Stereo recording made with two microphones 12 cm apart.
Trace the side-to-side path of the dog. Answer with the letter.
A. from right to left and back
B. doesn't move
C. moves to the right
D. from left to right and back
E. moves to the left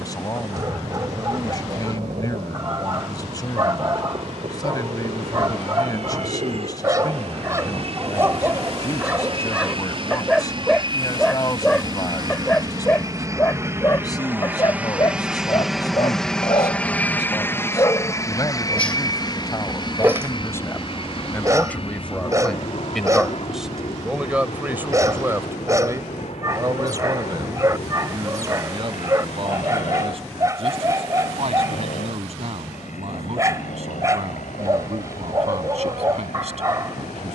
A.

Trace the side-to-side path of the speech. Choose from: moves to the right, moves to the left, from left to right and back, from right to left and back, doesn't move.
moves to the right.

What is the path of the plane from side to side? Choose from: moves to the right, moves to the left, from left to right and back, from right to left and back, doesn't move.
moves to the left.